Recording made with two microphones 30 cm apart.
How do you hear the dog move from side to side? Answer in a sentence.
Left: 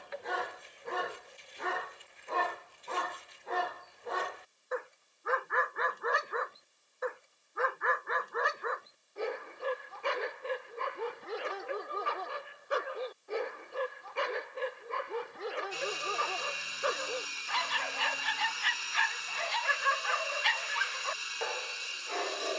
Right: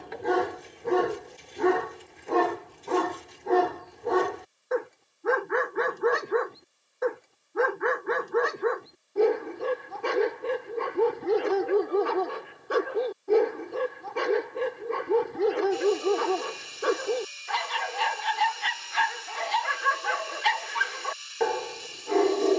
You can hear the dog stay put.